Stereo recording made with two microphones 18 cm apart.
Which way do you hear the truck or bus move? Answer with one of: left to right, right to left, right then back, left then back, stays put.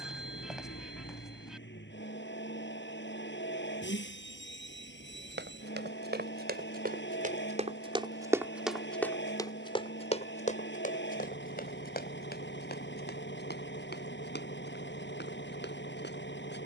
stays put.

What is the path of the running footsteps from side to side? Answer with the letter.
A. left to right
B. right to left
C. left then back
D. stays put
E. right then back
B.